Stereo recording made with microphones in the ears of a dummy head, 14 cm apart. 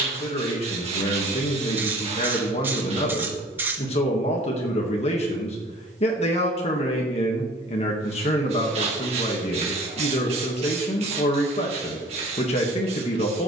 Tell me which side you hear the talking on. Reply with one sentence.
In this clip you hear the talking on the left.